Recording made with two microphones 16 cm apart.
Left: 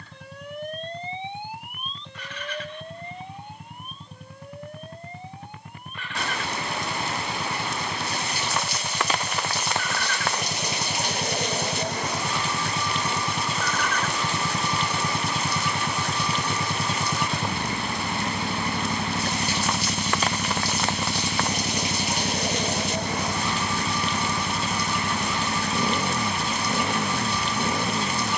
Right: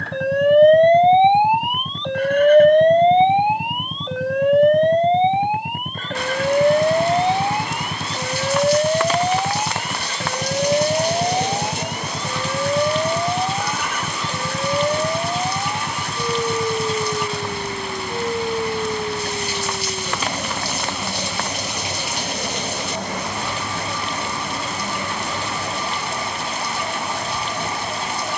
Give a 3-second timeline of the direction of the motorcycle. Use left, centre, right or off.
right, right, right, right, centre, centre, left, left, left, left.